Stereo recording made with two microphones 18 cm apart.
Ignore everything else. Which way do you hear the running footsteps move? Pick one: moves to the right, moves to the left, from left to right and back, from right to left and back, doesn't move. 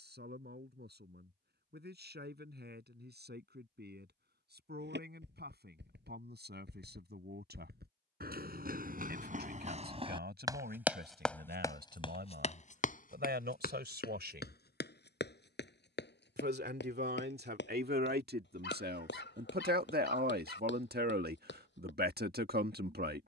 moves to the left.